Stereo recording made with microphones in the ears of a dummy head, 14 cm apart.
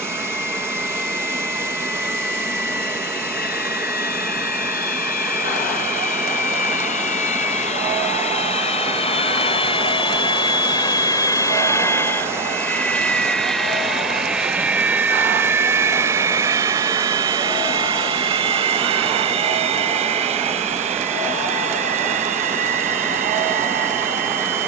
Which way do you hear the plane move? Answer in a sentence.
In this clip you hear the plane move from left to right.